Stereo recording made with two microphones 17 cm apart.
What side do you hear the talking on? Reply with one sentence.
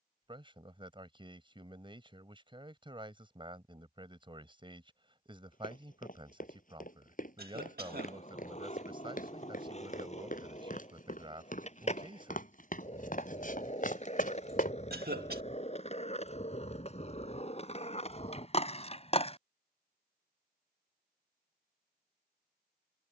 You can hear the talking on the right.